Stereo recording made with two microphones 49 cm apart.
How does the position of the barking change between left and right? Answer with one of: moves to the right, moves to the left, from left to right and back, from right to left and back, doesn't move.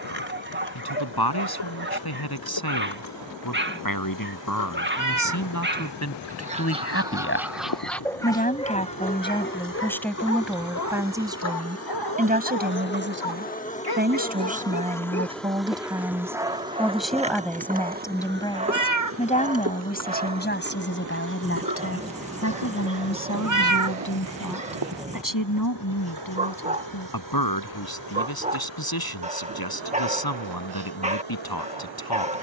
from right to left and back.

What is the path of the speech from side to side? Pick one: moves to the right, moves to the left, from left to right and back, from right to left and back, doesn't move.
from left to right and back.